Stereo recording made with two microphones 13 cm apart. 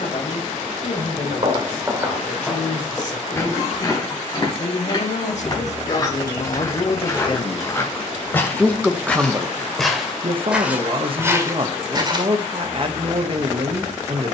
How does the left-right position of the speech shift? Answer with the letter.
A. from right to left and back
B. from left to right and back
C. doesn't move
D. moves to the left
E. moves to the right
E.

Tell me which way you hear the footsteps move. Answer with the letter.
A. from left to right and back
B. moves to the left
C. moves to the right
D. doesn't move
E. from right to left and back
E.